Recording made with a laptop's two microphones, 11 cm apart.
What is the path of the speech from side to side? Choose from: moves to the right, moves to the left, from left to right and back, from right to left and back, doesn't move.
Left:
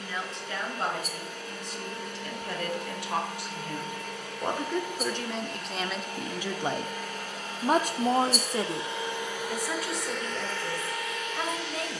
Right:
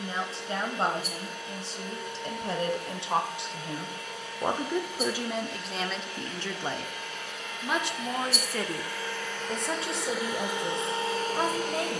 from right to left and back.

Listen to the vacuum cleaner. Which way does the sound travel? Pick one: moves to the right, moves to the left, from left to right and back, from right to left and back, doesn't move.
moves to the right.